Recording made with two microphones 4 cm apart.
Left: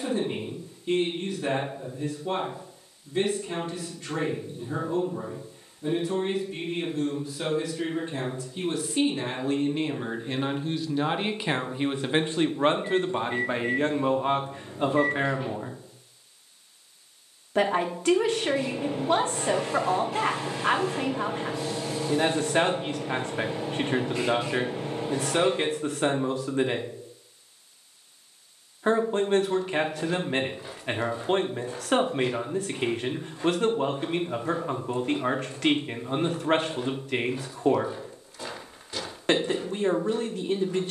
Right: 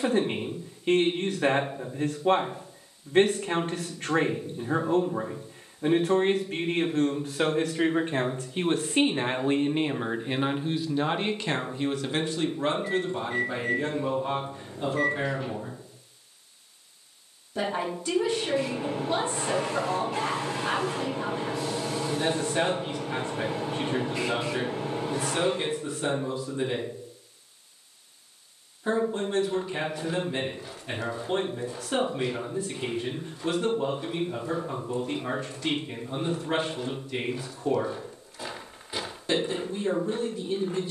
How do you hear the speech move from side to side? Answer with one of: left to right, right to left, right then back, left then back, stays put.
right to left.